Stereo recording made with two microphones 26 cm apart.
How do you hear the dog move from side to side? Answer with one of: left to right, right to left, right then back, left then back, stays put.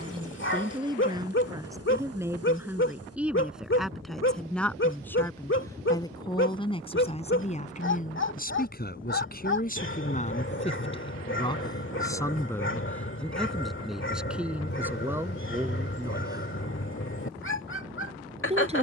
stays put.